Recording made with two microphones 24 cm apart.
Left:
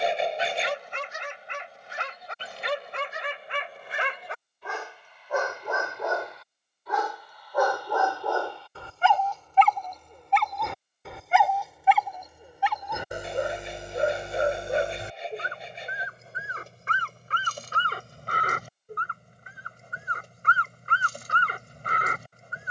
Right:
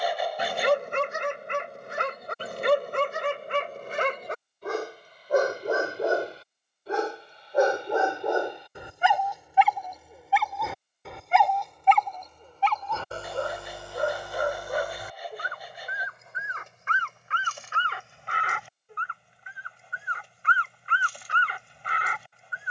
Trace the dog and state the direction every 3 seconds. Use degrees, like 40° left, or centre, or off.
50° right, 40° right, 20° right, centre, 20° left, 30° left, 40° left, 40° left.